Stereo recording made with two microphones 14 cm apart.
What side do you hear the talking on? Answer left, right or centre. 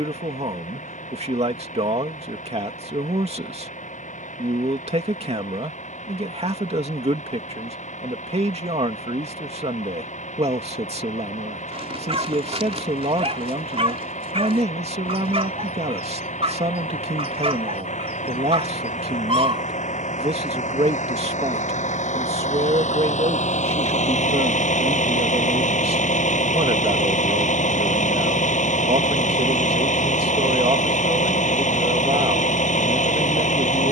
right.